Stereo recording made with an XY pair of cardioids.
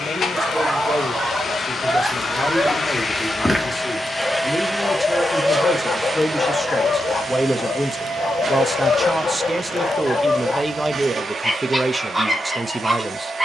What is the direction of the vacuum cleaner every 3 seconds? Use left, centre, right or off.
left, centre, right, right, right.